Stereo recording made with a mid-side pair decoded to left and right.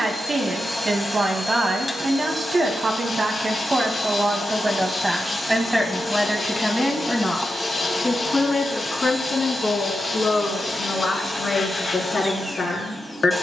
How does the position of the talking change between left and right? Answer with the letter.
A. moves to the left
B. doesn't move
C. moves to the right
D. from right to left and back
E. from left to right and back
A.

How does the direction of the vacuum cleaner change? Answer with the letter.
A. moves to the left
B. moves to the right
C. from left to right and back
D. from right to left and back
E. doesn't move
E.